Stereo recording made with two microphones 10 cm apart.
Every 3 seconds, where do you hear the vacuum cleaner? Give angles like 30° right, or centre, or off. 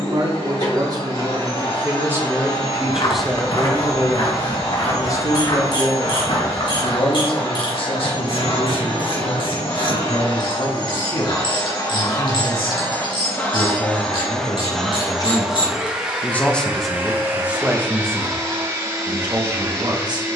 70° left, 70° left, 70° left, 50° left, 20° left, 20° right, 30° right.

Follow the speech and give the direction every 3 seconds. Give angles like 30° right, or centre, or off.
30° right, 20° left, 60° left, 70° left, 60° left, 10° left, 40° right.